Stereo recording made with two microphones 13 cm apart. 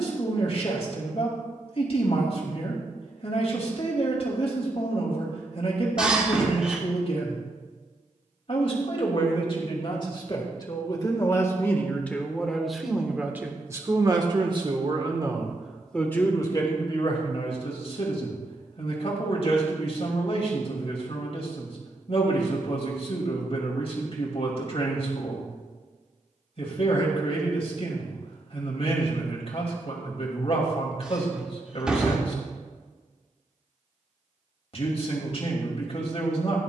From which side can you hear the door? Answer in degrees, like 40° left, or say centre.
10° right.